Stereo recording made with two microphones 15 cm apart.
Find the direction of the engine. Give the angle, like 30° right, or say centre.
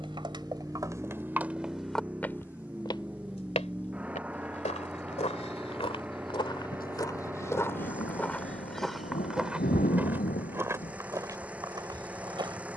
10° right.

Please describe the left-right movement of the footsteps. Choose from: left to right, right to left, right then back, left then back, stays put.
left then back.